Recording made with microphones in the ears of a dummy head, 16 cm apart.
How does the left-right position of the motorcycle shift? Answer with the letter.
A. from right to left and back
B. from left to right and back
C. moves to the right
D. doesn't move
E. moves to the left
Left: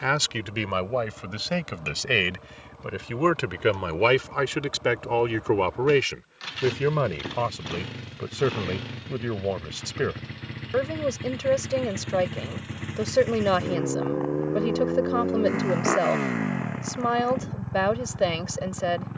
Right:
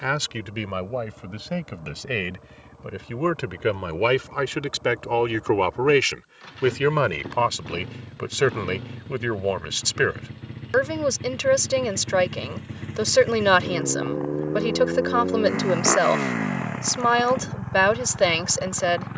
C.